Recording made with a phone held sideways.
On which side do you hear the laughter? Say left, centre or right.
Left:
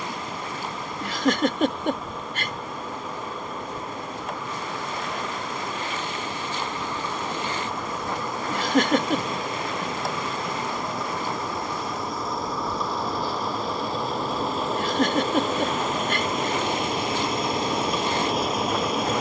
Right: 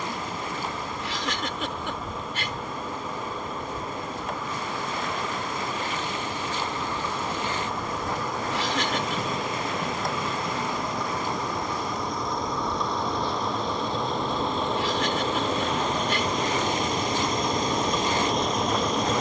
left.